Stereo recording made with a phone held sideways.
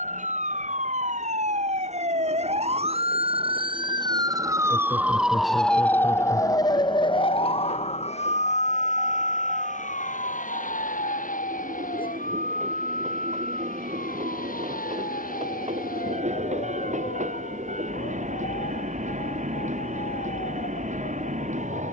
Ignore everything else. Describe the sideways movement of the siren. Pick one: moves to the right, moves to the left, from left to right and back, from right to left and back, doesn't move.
moves to the left.